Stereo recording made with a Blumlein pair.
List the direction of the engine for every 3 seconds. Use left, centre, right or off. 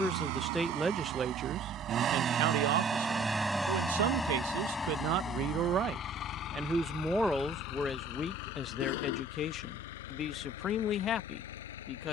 right, centre, left, left.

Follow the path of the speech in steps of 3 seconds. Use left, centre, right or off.
right, right, centre, left.